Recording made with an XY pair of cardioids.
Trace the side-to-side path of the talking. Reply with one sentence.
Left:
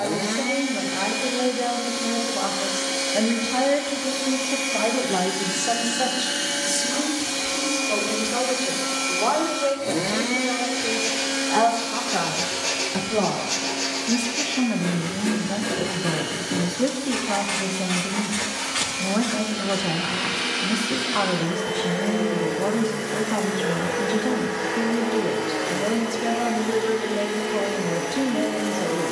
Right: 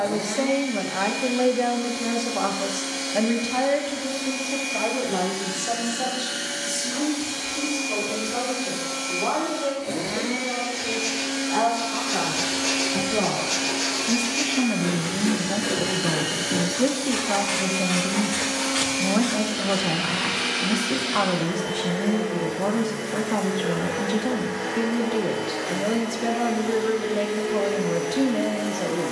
You can hear the talking go left and come back.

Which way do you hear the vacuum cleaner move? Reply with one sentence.
In this clip you hear the vacuum cleaner go right and come back.